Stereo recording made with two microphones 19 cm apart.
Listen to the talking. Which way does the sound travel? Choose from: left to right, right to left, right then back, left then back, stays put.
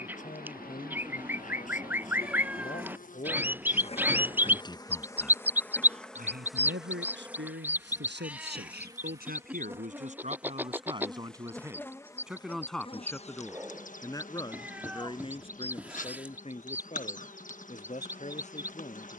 right then back.